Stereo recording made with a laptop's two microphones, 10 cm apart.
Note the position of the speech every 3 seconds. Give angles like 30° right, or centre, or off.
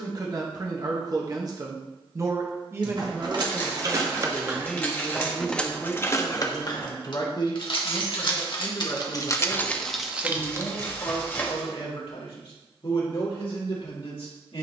40° right, centre, 50° left, 60° left, 70° left.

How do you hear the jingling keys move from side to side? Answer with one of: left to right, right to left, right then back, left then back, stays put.
left then back.